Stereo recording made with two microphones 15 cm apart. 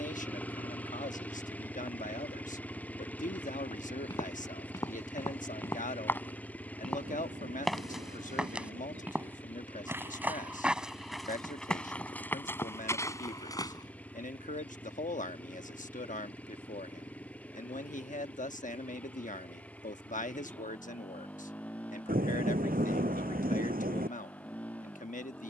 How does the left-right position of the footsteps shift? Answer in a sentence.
In this clip you hear the footsteps move from left to right and back again.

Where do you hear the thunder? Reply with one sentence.
You can hear the thunder on the right.